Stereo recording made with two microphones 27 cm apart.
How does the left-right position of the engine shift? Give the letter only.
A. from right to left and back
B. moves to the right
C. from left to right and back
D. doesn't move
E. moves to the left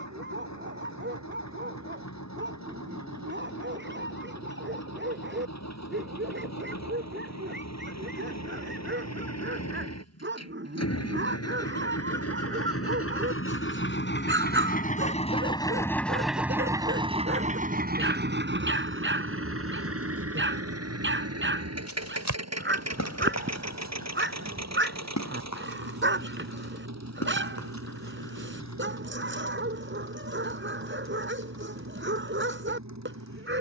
B.